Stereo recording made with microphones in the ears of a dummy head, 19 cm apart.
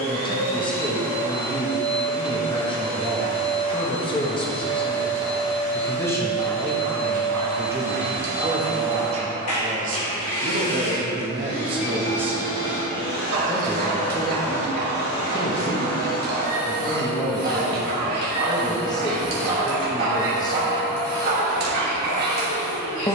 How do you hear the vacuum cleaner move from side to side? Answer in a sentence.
In this clip you hear the vacuum cleaner stay in one place.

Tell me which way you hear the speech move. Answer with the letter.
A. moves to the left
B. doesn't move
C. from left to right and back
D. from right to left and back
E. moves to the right
C.